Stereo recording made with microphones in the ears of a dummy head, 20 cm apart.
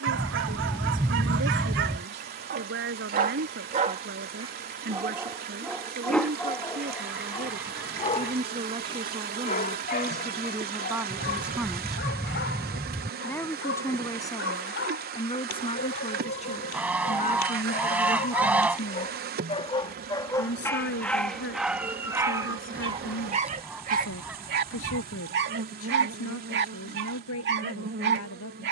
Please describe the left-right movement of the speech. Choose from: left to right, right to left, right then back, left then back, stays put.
right to left.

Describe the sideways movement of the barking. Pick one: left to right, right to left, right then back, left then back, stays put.
left then back.